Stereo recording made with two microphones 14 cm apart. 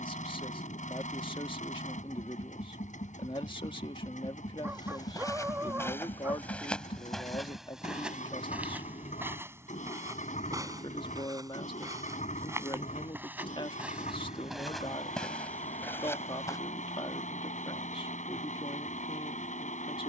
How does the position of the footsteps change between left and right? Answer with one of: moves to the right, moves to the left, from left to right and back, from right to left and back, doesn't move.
from left to right and back.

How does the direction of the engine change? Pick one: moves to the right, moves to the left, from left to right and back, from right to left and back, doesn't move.
doesn't move.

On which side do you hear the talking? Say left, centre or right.
left.